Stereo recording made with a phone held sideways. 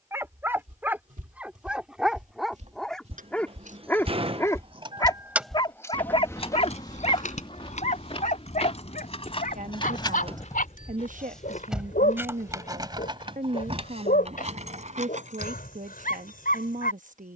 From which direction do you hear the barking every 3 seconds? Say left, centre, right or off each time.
centre, left, left, left, left, left.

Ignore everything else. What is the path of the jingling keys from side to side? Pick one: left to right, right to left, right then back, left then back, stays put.
left then back.